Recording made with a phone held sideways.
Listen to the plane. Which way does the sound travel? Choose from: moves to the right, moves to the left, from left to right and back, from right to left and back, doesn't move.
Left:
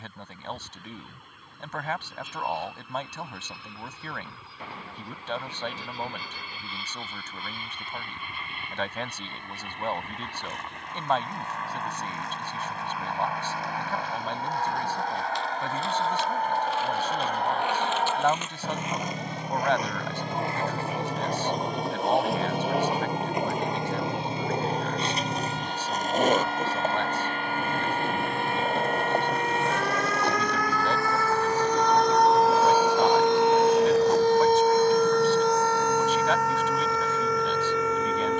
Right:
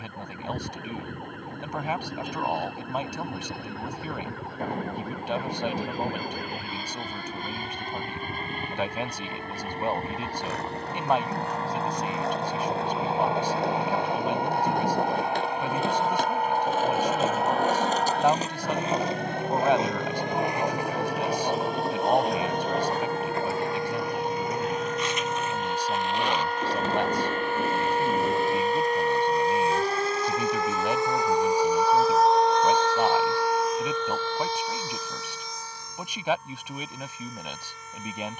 moves to the left.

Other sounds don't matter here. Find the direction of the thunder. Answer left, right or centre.
right.